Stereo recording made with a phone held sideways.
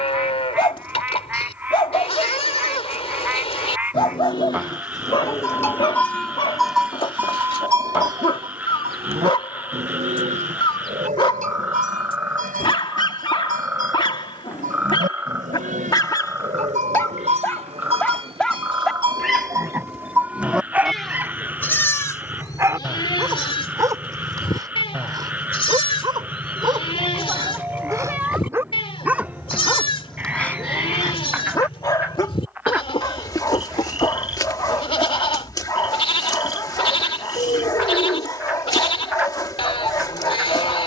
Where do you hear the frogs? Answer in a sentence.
You can hear the frogs in the centre.